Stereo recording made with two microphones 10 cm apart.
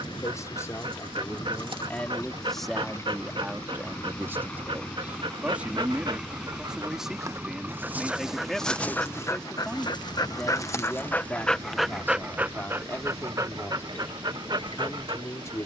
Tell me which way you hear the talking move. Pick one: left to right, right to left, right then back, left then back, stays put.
right then back.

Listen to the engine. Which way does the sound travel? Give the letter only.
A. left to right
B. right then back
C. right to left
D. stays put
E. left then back
A.